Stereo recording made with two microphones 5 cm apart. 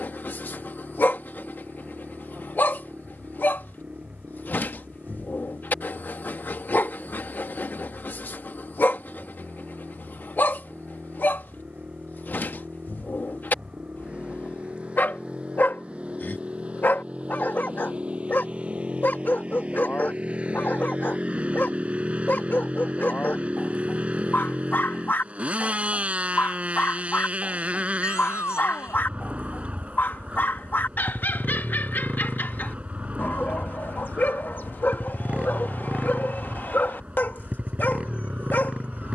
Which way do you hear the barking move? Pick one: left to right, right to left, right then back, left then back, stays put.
stays put.